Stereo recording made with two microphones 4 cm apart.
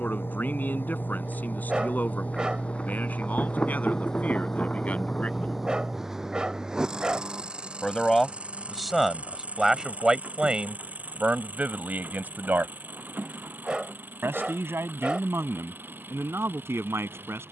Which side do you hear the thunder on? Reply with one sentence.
You can hear the thunder on the left.